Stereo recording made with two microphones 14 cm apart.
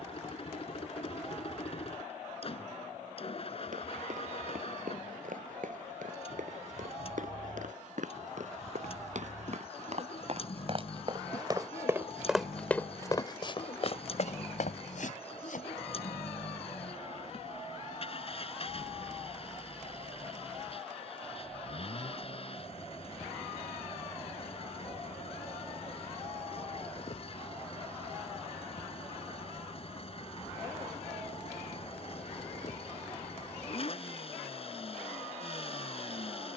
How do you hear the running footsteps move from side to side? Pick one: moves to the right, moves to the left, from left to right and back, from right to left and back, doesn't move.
moves to the left.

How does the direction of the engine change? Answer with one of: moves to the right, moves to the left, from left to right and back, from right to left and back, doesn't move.
doesn't move.